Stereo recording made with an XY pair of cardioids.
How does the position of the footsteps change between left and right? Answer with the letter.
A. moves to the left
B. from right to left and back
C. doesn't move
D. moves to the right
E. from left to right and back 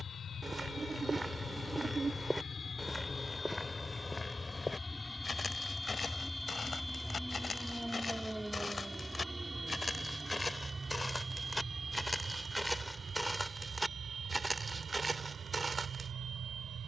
B.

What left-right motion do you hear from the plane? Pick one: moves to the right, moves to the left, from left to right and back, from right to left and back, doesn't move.
moves to the right.